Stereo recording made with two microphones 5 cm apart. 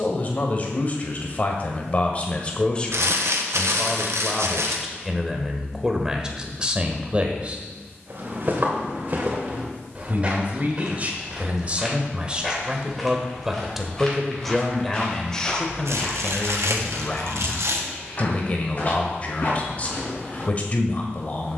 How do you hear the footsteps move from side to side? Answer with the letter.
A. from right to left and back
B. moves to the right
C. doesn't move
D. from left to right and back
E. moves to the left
E.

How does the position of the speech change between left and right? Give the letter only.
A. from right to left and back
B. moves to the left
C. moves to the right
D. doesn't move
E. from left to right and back
E.